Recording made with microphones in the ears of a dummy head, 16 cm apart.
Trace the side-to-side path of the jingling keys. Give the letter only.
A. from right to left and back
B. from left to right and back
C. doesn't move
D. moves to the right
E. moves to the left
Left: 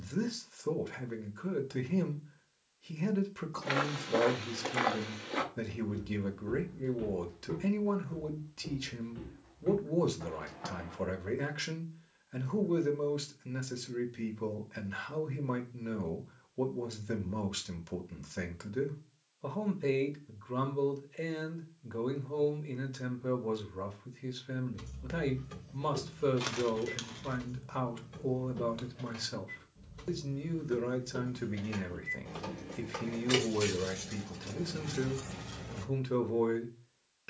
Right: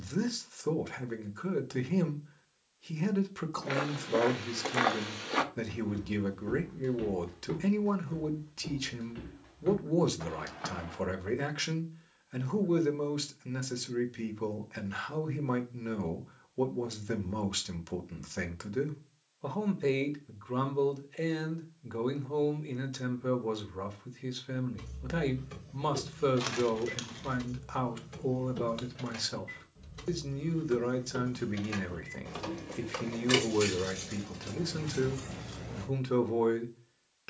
B.